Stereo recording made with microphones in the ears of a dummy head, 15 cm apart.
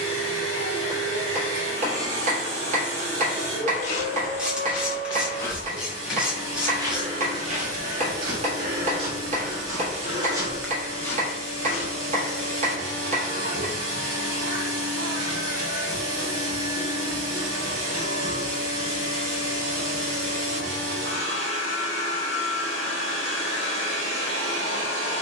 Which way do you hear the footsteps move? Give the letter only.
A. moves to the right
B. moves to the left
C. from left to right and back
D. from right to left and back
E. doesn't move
C.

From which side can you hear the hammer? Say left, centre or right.
right.